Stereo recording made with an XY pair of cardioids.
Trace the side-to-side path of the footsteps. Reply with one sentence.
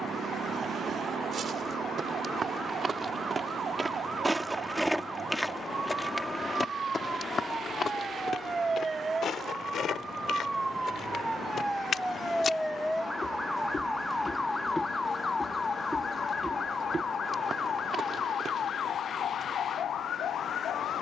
In this clip you hear the footsteps go left and come back.